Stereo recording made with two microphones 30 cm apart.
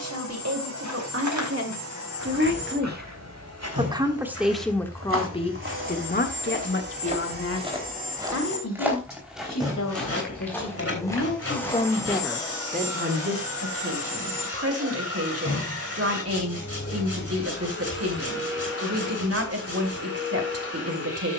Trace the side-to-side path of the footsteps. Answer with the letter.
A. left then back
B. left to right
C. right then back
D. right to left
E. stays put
D.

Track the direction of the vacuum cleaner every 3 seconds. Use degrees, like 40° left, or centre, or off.
60° right, 50° right, 30° right, centre, 20° left, 40° left, 50° left.